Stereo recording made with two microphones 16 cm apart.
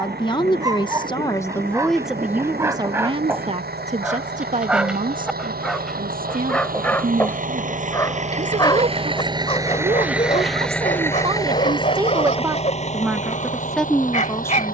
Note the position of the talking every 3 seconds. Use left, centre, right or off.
centre, right, right, right, centre.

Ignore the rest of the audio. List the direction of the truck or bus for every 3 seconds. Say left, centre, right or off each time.
right, right, right, centre, left.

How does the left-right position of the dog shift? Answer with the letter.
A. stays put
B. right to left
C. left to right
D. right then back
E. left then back
B.